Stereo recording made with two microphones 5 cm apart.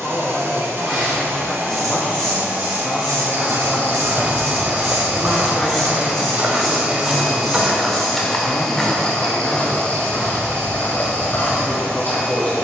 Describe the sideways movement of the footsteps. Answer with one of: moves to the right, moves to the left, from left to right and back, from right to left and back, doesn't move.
moves to the left.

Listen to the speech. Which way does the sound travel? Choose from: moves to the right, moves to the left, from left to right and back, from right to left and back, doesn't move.
doesn't move.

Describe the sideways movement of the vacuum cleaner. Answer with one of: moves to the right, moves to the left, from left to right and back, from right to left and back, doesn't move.
moves to the left.